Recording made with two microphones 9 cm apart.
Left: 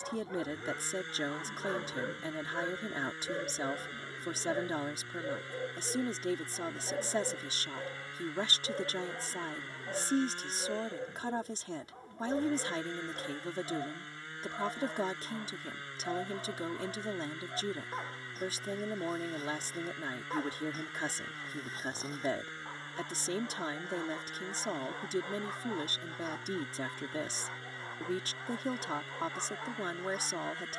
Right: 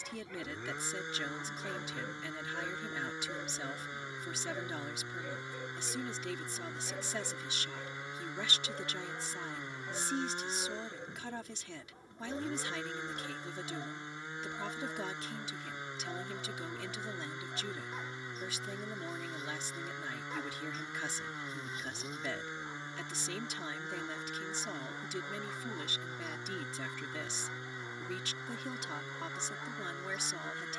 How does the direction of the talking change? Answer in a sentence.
In this clip you hear the talking stay in one place.